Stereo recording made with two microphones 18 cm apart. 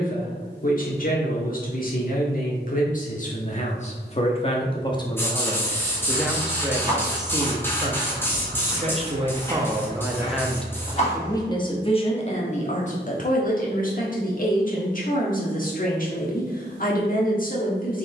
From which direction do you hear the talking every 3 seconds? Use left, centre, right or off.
left, left, right, centre, left, left.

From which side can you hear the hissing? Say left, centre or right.
centre.